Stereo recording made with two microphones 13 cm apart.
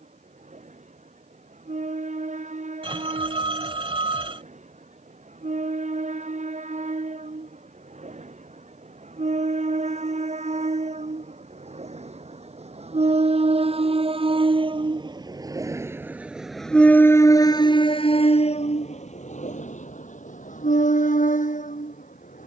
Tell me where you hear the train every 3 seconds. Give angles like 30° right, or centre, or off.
70° right, 70° right, 70° right, 60° right, 50° right, centre, 70° left, 80° left.